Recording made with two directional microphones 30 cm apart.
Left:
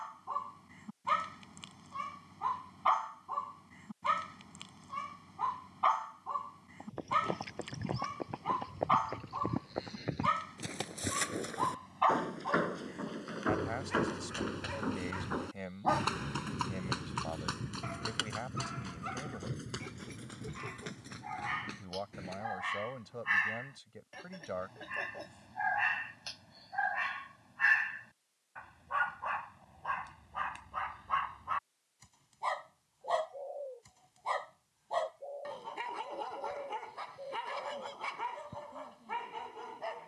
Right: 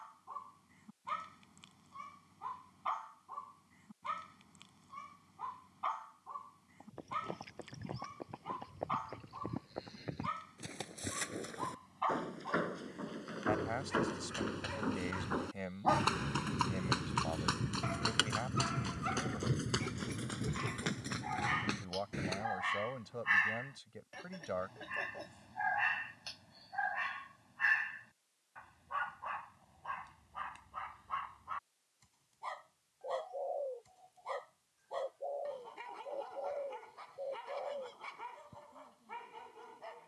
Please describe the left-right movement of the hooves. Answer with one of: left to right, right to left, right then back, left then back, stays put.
left to right.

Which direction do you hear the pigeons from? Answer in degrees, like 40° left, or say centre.
30° right.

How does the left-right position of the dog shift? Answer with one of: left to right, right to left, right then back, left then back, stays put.
right then back.